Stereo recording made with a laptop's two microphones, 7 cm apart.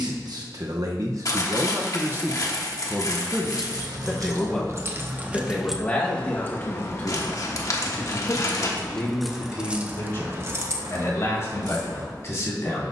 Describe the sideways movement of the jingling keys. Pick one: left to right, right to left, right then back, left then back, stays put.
left then back.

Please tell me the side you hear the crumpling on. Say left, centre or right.
left.